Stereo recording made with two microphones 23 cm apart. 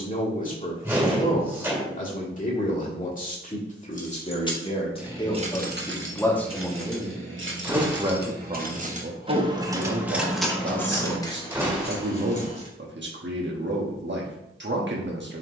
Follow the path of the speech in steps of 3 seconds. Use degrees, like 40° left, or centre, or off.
40° left, 30° left, 10° right, 50° right, 50° right.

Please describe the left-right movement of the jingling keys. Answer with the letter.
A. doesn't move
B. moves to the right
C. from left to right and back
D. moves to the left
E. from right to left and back
C.